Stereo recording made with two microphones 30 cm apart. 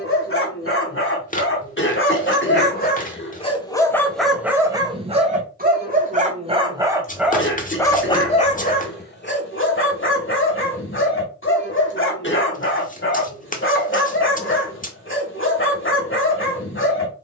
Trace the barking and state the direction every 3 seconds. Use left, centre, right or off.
left, centre, centre, left, left, left.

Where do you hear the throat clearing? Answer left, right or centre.
left.